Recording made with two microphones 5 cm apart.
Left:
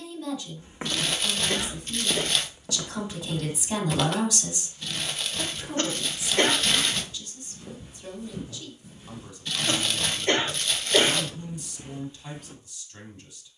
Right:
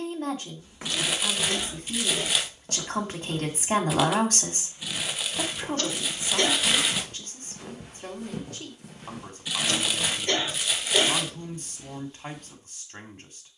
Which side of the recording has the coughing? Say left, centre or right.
left.